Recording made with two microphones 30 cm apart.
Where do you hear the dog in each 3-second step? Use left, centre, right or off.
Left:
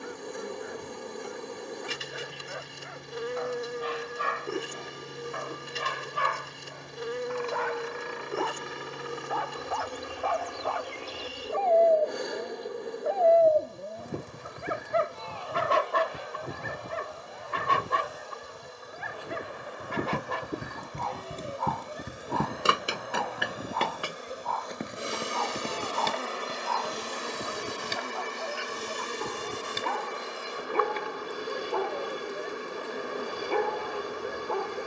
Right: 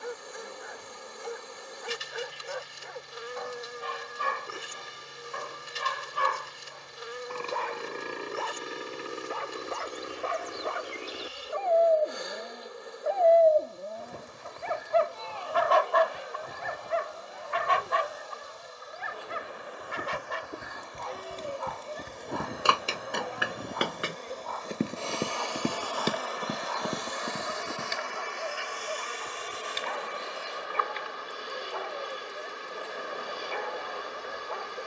right, right, right, right, centre, left, left, left, left, left, left, left.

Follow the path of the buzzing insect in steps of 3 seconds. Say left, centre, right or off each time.
left, left, left, left, left, left, left, centre, left, left, left, left.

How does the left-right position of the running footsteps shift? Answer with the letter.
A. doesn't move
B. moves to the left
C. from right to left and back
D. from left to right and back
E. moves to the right
E.